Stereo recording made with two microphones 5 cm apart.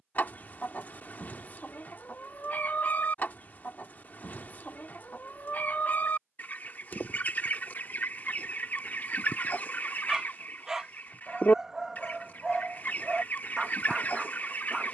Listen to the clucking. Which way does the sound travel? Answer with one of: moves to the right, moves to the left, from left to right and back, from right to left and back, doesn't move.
doesn't move.